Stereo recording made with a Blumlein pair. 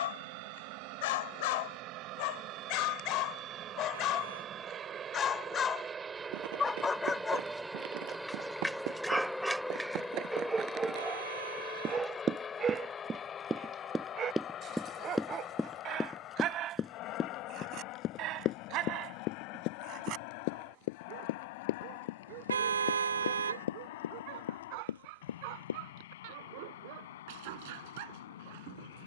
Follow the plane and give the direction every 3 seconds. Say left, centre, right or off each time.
right, right, centre, centre, left, left, left, left, left, left.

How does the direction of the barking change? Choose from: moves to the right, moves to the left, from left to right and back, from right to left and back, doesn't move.
moves to the right.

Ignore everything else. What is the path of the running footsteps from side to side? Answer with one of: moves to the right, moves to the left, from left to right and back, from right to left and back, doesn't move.
moves to the left.